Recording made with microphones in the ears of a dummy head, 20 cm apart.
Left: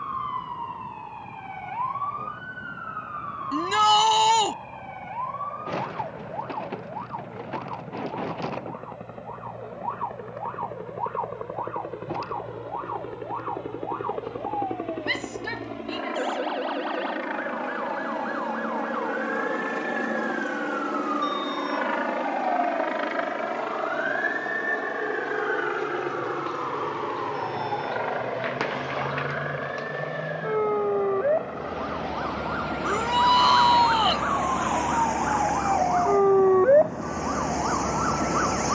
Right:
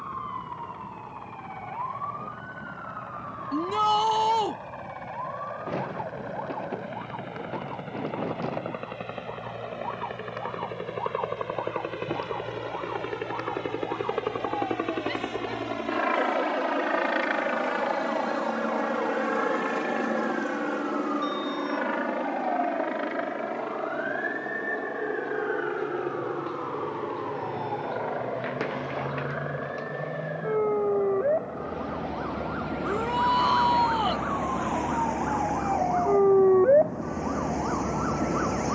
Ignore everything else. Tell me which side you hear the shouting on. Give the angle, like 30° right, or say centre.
50° left.